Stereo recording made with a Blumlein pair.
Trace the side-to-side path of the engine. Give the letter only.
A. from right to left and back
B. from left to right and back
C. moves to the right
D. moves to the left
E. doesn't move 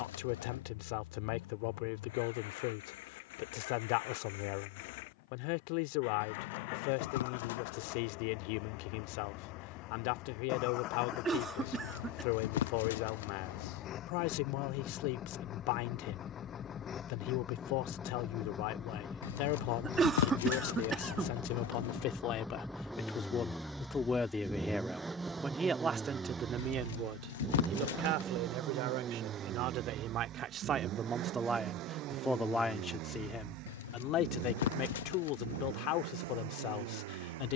C.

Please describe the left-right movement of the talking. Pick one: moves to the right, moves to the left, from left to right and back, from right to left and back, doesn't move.
from left to right and back.